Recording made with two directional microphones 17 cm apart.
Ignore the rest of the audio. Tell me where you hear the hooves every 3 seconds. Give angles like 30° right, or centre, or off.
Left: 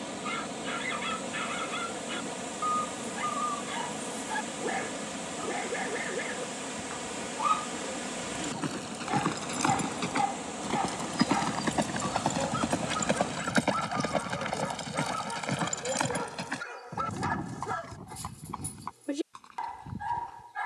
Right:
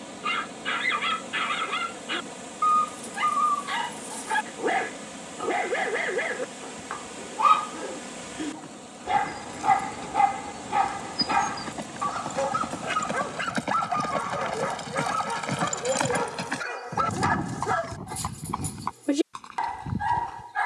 off, off, 60° left, 50° left, 20° left, 20° right, 50° right.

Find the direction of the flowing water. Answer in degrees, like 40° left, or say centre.
10° left.